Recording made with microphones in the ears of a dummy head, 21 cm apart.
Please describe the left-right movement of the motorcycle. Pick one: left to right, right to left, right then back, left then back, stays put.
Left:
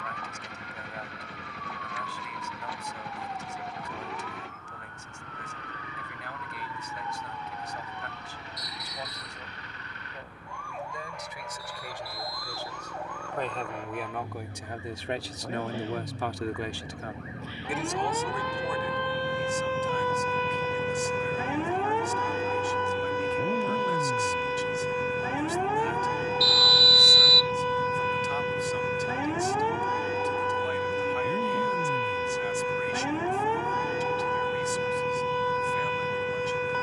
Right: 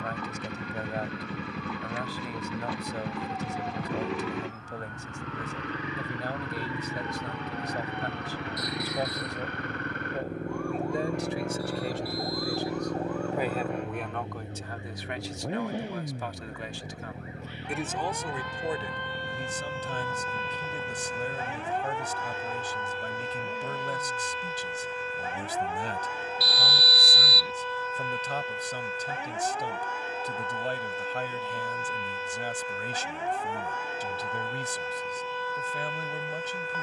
right to left.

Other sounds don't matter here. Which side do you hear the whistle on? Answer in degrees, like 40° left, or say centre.
60° right.